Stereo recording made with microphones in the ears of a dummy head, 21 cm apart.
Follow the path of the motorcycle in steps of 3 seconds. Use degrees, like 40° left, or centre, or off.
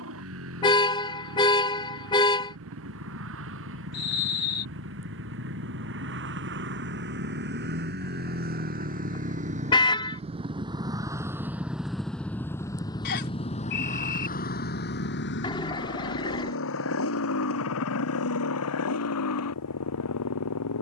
60° right, 60° right, 50° right, 20° right, 30° left, 60° left, 70° left.